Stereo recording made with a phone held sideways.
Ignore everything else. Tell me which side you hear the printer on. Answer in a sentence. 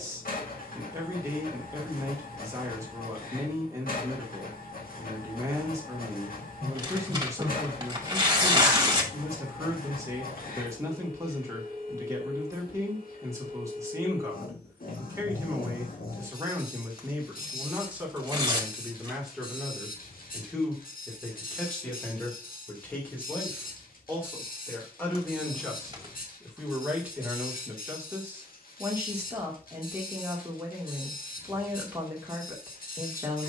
In this clip you hear the printer on the left.